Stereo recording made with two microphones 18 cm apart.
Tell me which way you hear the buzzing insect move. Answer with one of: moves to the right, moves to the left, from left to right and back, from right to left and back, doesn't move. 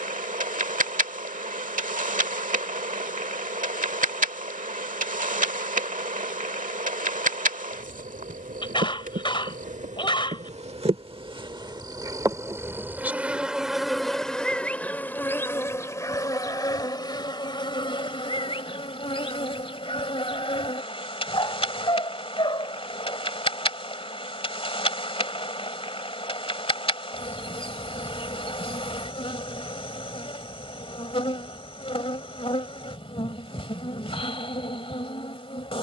moves to the left.